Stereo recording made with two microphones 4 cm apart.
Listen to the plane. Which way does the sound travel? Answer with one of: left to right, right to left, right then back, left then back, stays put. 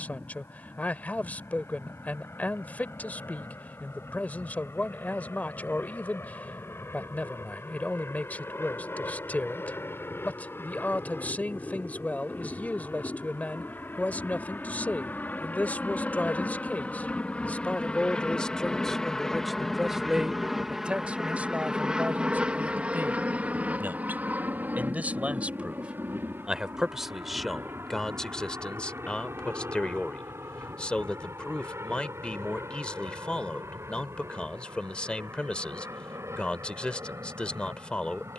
left to right.